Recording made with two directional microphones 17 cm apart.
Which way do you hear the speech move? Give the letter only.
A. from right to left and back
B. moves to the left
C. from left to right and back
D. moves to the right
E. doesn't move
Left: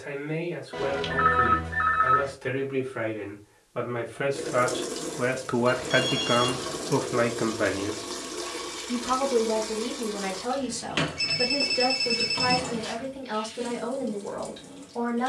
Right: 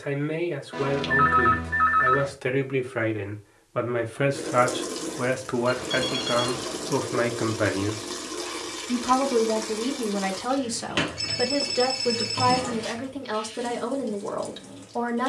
A.